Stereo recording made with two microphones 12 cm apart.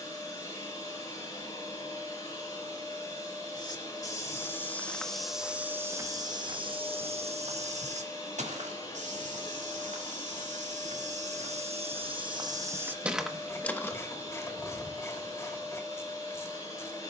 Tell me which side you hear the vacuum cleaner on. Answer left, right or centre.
left.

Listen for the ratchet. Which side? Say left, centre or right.
left.